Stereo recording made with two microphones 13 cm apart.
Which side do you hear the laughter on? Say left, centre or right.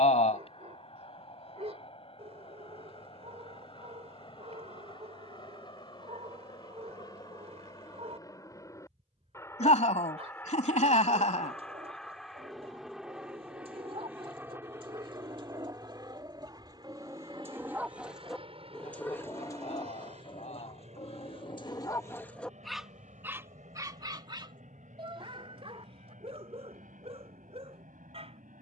left.